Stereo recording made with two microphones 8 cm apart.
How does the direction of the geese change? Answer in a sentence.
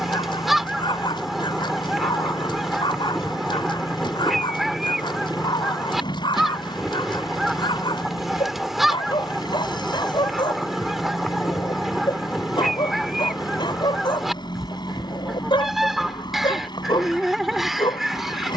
In this clip you hear the geese stay put.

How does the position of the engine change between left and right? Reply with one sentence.
In this clip you hear the engine stay in one place.